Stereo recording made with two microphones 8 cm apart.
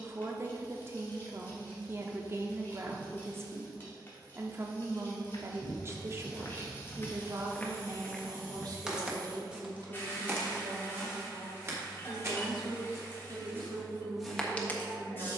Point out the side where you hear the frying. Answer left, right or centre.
left.